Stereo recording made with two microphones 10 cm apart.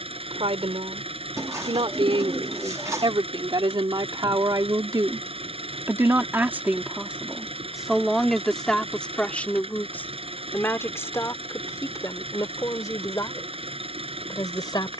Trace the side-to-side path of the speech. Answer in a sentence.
In this clip you hear the speech move from right to left.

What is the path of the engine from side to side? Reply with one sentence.
In this clip you hear the engine stay put.